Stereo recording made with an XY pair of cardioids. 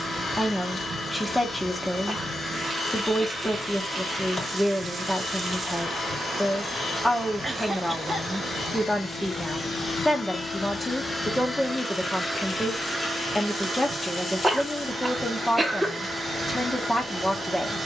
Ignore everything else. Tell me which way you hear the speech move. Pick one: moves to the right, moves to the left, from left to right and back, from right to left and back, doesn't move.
doesn't move.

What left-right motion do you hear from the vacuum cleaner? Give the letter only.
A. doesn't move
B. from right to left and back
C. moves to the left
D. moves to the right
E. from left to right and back
D.